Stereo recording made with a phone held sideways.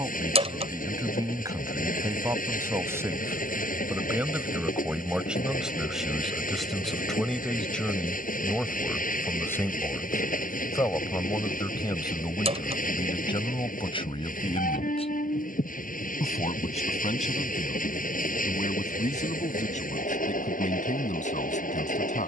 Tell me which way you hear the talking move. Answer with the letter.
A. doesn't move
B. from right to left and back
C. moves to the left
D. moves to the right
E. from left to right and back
C.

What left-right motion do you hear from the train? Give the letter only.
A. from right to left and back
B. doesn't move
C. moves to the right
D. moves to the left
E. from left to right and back
B.